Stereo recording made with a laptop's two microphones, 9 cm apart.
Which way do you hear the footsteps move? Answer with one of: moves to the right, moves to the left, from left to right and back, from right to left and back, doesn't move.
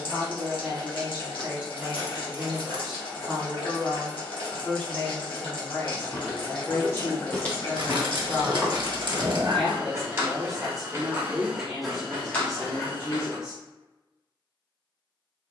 from left to right and back.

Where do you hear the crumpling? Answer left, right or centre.
right.